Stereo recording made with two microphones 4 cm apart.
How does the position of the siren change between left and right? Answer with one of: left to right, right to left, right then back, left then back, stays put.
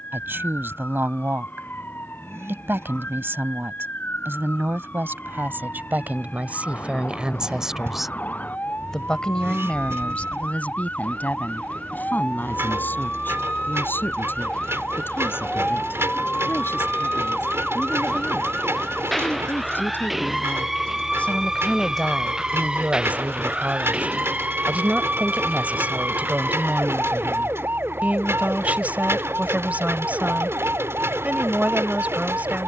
left to right.